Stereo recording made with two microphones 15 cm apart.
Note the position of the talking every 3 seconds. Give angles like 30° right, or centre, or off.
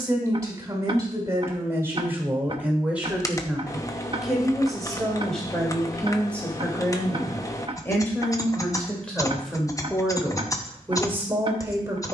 20° right, centre, 10° left, 10° right.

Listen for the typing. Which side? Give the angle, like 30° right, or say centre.
20° left.